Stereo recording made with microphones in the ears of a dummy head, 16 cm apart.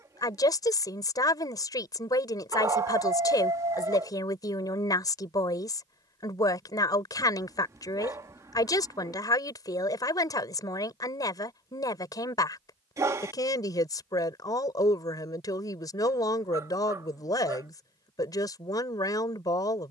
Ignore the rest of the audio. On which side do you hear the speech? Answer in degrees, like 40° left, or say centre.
20° left.